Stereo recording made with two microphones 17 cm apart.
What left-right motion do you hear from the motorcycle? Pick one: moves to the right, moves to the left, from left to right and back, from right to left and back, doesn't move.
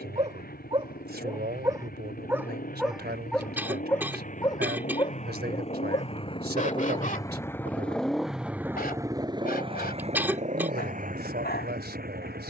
moves to the right.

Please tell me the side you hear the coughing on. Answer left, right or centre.
centre.